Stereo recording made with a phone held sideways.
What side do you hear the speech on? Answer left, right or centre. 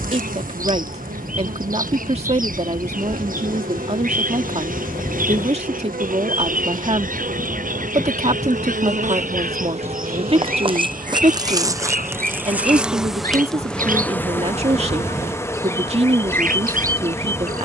right.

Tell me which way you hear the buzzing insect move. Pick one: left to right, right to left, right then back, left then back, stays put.
right to left.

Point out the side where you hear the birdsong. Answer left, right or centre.
right.